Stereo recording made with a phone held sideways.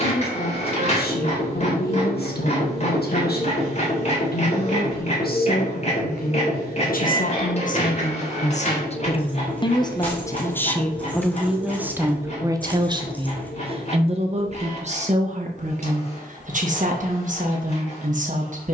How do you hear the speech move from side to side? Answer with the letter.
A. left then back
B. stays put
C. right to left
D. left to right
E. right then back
D.